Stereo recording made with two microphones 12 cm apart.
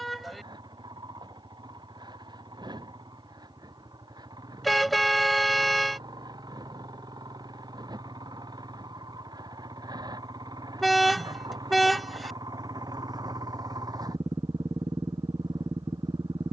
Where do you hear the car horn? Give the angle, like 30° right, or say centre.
centre.